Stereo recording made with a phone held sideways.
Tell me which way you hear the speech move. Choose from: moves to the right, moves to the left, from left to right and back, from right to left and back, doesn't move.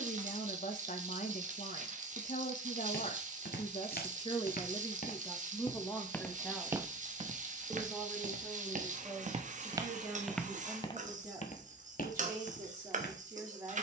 moves to the right.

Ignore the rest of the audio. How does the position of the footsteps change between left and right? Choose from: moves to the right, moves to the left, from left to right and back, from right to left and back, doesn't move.
from left to right and back.